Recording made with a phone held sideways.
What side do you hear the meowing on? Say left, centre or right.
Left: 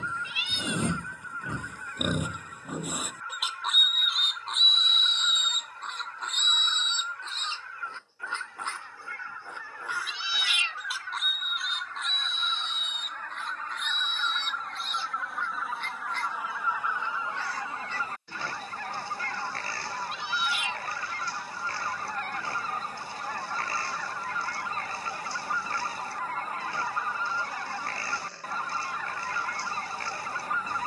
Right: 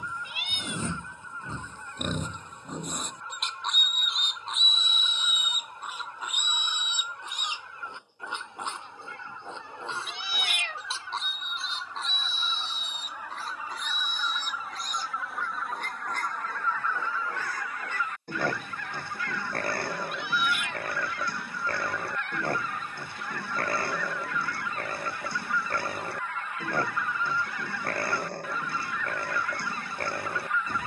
right.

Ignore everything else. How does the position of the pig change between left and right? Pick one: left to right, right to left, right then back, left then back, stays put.
left to right.